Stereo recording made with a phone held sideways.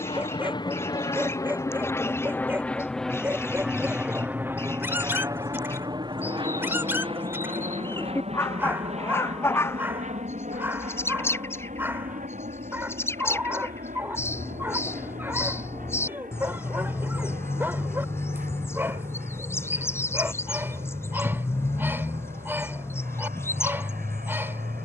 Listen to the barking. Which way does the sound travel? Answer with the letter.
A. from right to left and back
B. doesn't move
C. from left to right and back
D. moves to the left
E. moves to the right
B.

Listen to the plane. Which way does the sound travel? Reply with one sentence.
In this clip you hear the plane move from left to right.